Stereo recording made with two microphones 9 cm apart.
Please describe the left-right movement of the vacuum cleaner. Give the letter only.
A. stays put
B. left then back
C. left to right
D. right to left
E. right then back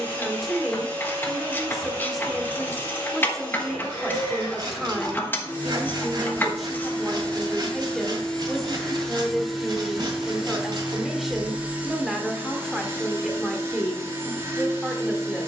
C.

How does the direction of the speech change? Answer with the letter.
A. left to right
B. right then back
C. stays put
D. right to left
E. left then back
C.